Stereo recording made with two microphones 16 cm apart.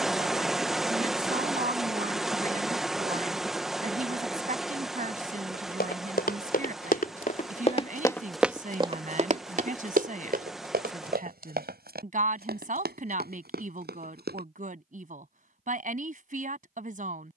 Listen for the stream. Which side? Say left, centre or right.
centre.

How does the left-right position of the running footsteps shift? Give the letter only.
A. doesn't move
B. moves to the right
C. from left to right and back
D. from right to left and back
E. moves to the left
B.